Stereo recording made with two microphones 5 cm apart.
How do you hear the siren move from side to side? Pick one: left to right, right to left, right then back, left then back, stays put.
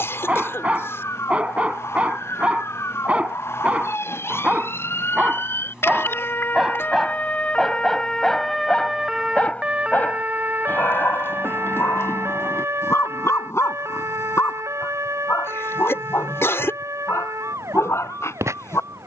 left to right.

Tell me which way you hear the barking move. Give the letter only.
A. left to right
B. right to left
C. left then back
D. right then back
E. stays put
B.